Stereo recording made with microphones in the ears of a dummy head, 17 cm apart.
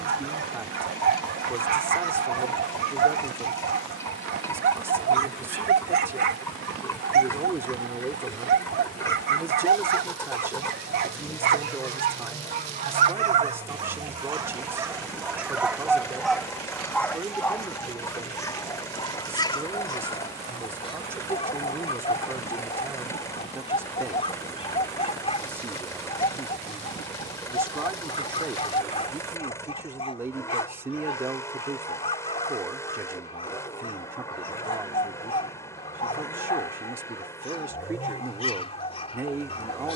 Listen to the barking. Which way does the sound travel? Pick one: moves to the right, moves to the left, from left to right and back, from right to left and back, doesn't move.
moves to the left.